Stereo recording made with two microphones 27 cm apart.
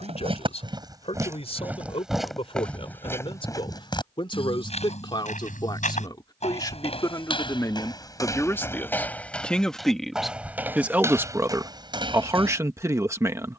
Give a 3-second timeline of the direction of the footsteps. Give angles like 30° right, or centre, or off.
10° right, 20° left, 20° left, 10° right, 20° right.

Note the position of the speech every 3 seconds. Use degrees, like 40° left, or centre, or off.
20° left, 20° left, 10° left, centre, 10° right.